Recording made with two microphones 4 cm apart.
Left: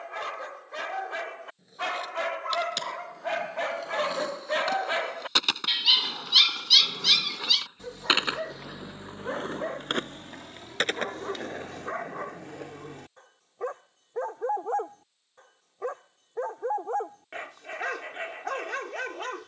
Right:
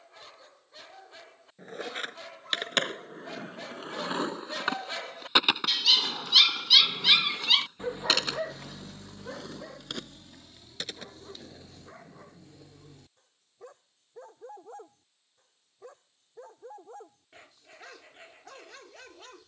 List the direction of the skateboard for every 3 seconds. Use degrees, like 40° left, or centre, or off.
50° right, 30° right, 10° left, 50° left, 60° left, off, off.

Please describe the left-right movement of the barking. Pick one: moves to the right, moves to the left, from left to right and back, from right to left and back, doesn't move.
from left to right and back.